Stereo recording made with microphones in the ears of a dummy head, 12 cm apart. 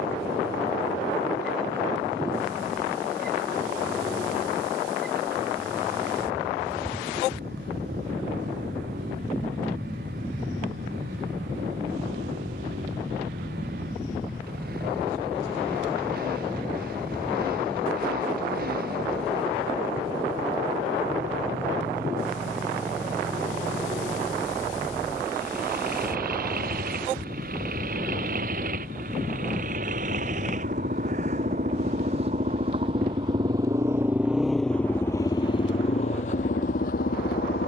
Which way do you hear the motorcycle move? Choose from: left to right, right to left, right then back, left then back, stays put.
right to left.